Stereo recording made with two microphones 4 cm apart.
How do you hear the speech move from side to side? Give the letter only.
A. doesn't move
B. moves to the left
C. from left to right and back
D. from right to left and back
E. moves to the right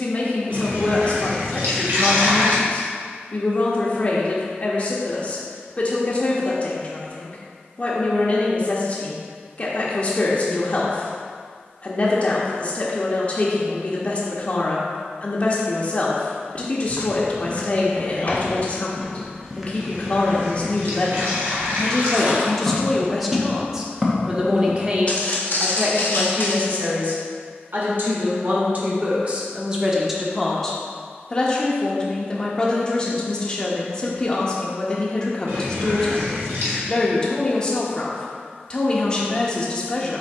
C.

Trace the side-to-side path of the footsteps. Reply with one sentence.
In this clip you hear the footsteps move from left to right and back again.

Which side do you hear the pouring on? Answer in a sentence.
You can hear the pouring on the right.